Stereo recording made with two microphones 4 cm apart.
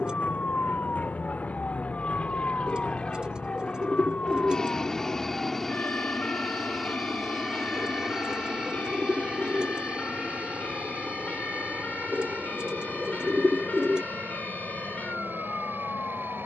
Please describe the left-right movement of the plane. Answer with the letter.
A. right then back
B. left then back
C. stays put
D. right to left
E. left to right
E.